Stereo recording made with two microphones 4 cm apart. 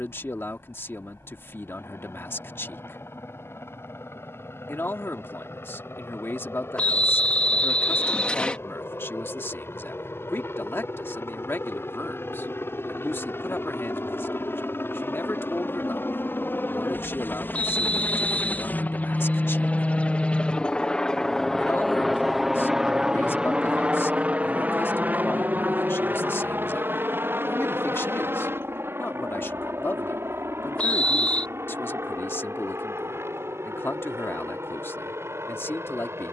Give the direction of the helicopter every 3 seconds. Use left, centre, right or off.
left, left, left, left, left, left, left, centre, right, right, right, right.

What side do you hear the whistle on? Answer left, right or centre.
left.